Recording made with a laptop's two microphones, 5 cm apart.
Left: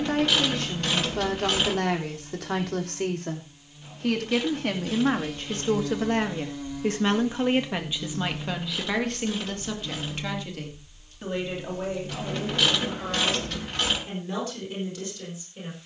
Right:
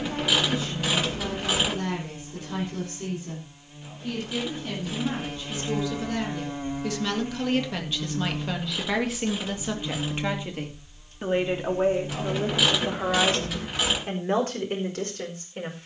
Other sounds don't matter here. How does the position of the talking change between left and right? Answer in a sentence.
You can hear the talking move from left to right.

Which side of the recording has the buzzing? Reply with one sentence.
In this clip you hear the buzzing on the right.